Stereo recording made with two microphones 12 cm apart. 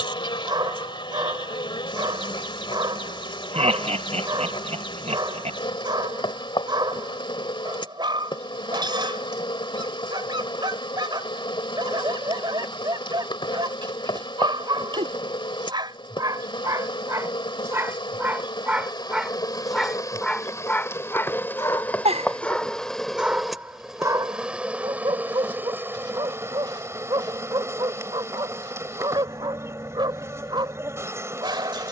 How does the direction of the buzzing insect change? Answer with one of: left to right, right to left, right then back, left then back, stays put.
left to right.